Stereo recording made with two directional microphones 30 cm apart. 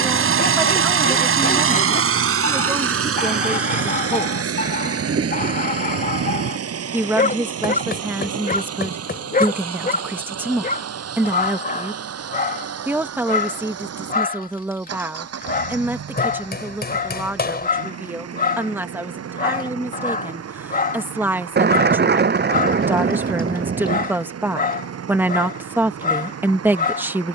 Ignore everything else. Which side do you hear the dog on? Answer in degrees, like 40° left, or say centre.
30° left.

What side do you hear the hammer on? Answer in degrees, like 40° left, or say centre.
30° left.